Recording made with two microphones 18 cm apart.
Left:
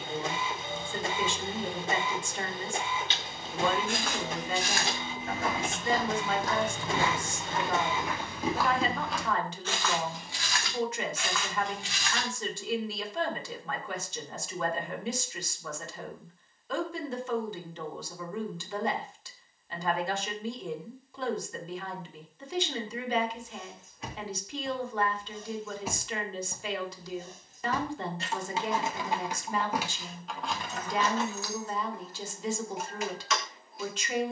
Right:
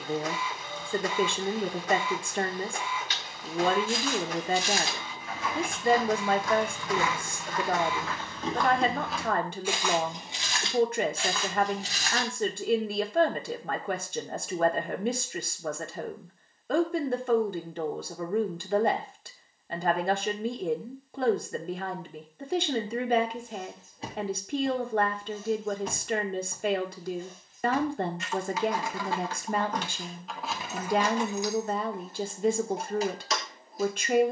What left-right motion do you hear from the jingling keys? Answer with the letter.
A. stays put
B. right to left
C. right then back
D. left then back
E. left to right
D.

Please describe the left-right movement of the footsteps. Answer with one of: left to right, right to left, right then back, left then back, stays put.
left to right.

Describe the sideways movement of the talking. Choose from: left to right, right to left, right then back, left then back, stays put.
stays put.